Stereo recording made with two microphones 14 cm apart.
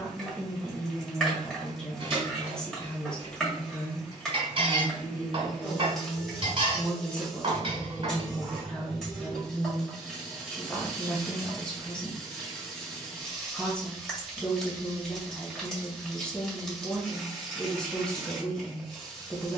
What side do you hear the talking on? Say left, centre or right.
centre.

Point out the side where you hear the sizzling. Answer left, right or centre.
centre.